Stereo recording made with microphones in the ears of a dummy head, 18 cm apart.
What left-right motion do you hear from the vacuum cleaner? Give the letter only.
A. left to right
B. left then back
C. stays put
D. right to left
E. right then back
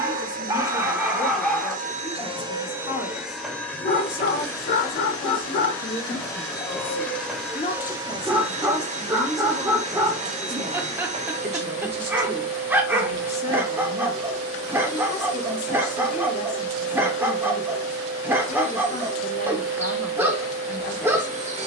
B.